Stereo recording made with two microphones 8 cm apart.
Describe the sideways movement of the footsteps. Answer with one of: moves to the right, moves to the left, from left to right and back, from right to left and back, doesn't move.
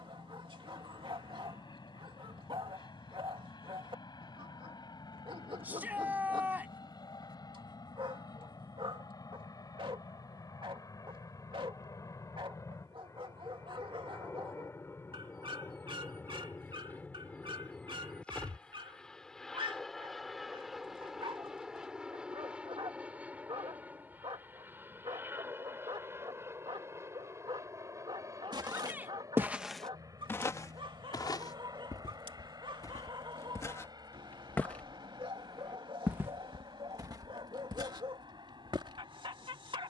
from right to left and back.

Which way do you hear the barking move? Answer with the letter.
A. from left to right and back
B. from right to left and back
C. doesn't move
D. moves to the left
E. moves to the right
C.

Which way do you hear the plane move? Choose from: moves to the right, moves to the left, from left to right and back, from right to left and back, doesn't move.
moves to the right.